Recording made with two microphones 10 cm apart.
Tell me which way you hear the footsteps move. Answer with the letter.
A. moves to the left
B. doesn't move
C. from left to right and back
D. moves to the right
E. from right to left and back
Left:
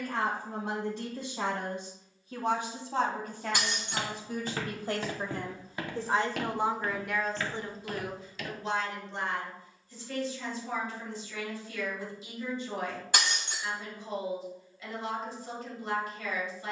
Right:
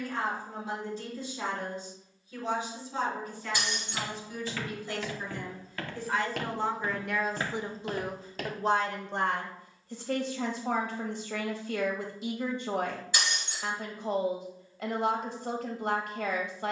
D.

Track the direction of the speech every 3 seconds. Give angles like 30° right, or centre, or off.
60° left, 50° left, 10° right, 60° right, 60° right, 60° right.